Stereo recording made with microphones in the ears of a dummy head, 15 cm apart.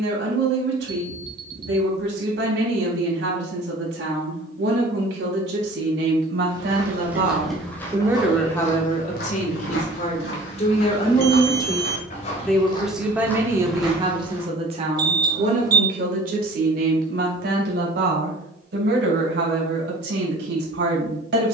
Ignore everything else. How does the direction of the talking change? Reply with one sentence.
In this clip you hear the talking go left and come back.